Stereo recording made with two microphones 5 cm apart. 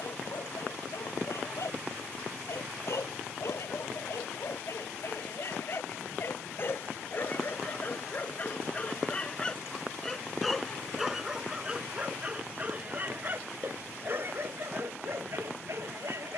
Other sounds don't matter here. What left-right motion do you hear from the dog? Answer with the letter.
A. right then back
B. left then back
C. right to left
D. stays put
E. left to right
E.